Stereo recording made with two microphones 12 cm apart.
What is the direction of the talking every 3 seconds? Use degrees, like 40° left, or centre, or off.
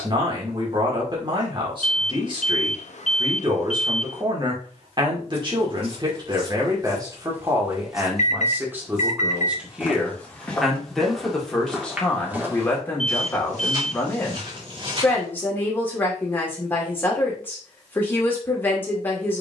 40° right, 40° right, 30° right, centre, 10° left, 20° left, 20° left.